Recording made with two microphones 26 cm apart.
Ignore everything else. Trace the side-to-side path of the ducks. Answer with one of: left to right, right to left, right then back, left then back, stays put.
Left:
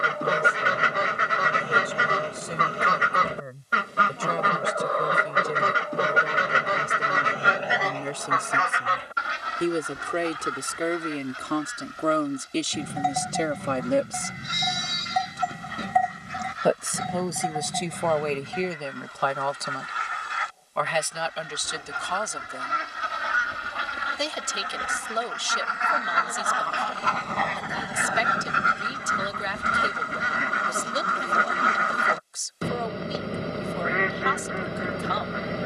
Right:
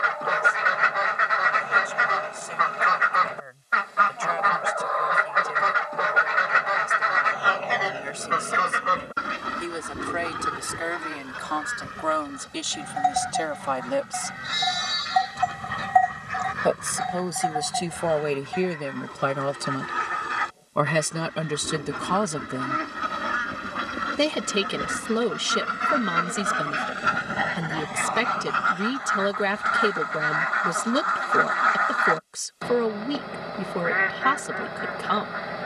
right then back.